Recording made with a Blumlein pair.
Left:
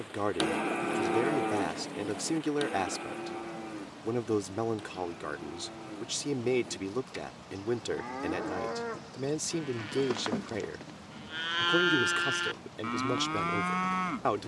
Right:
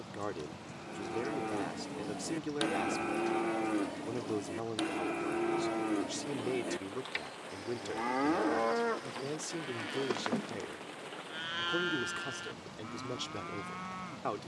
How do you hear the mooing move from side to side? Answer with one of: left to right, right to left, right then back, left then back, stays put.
right then back.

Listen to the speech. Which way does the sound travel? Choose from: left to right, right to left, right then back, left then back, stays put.
stays put.